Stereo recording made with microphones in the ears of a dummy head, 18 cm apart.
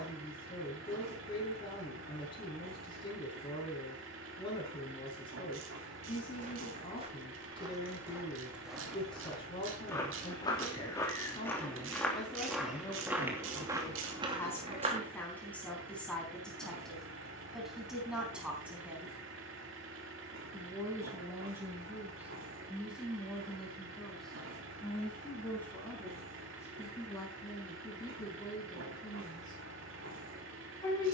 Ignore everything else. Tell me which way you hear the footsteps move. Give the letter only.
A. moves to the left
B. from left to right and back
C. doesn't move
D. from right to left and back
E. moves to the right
D.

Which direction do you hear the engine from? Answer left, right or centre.
right.